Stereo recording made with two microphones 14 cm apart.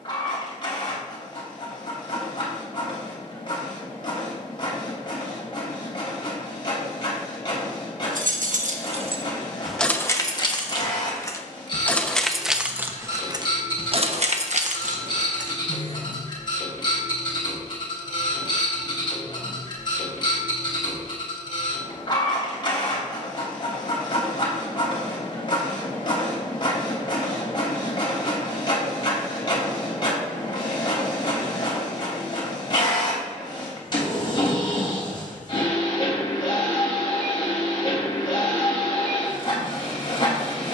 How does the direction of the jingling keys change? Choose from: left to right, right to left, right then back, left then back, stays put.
left then back.